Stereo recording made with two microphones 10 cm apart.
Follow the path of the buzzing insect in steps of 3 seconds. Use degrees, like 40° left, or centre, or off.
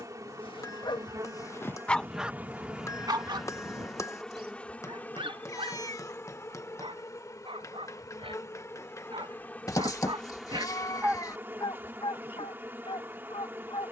30° right, 10° left, 30° left, centre, 20° right.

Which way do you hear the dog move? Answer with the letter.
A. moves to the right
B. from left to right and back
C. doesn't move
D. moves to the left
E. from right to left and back
B.